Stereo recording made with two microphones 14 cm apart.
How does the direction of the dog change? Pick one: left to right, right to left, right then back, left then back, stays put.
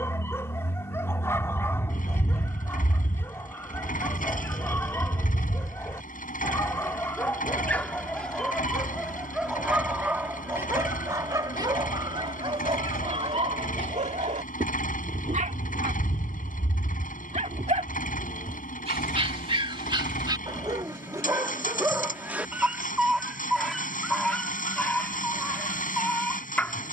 right then back.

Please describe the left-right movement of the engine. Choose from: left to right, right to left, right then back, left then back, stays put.
stays put.